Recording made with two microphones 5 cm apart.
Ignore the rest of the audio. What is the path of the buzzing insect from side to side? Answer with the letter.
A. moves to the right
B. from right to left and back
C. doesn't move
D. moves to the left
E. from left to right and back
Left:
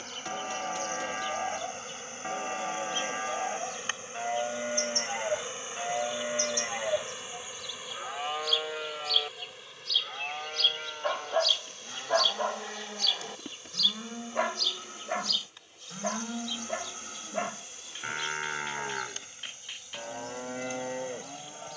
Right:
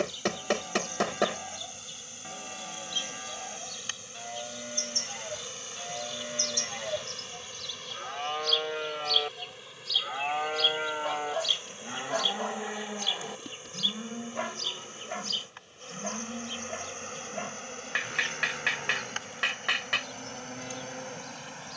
A.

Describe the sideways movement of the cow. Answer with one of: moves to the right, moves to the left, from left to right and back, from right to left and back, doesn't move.
from left to right and back.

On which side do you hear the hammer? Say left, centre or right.
right.